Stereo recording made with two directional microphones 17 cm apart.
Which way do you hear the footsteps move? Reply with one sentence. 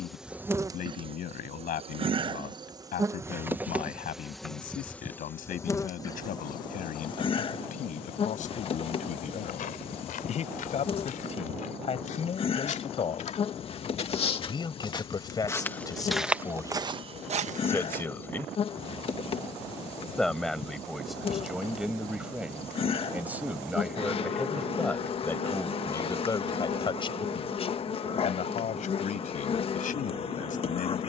In this clip you hear the footsteps move to the right.